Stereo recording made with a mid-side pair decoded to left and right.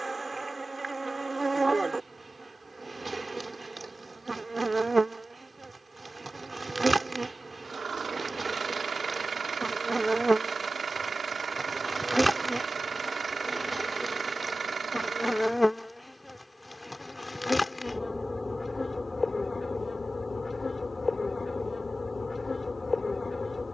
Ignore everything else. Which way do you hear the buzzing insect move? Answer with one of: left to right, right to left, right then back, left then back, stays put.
right to left.